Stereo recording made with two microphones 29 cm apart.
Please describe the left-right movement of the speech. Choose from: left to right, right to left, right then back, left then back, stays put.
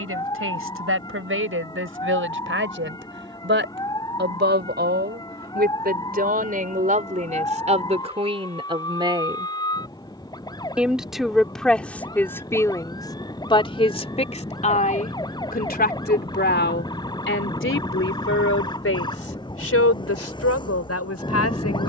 right to left.